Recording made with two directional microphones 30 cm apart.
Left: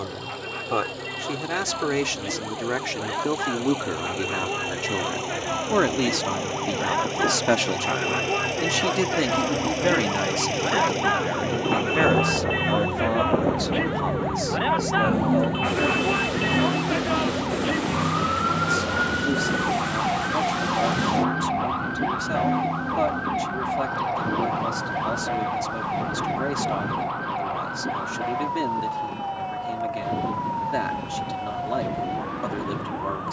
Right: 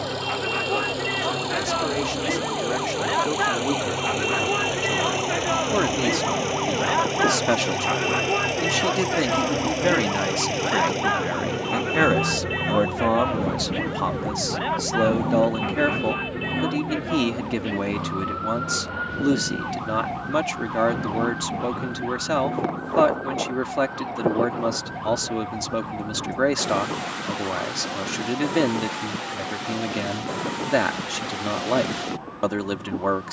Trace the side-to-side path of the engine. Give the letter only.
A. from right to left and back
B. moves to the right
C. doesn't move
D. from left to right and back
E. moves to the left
E.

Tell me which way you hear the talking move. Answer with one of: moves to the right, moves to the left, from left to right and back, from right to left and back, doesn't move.
moves to the right.